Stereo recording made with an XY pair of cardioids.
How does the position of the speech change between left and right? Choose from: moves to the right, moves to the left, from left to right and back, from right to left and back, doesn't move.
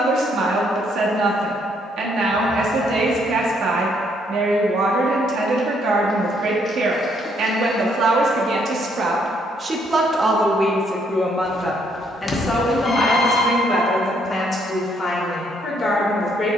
moves to the left.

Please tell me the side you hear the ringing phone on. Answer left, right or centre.
left.